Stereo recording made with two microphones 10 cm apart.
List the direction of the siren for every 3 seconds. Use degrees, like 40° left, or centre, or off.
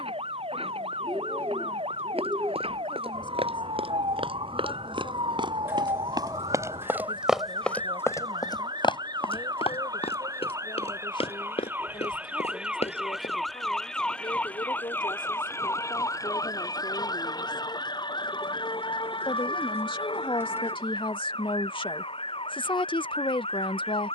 70° right, 60° right, 50° right, 30° right, centre, 30° left, 50° left, 60° left.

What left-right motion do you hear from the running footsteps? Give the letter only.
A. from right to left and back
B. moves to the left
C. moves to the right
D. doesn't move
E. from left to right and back
B.